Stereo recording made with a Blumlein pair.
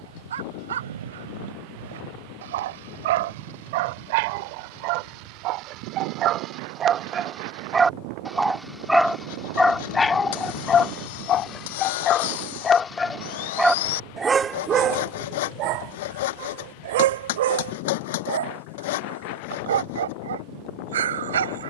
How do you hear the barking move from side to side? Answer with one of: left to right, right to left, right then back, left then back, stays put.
left then back.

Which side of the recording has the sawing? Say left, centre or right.
left.